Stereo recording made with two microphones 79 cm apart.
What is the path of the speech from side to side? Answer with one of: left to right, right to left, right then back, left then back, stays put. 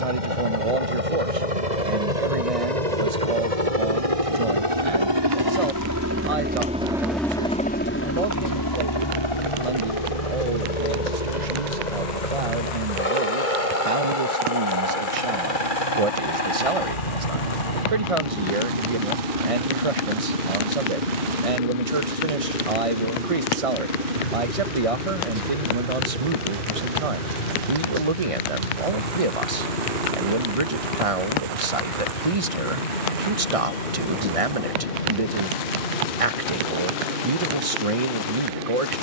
stays put.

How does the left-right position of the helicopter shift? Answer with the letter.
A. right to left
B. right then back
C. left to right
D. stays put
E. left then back
A.